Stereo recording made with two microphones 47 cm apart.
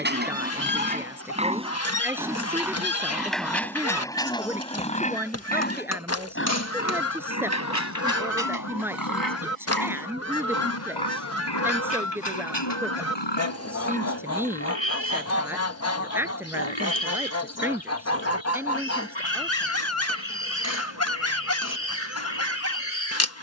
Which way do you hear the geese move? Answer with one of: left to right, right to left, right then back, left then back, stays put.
stays put.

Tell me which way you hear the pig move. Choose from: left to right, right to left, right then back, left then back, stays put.
right to left.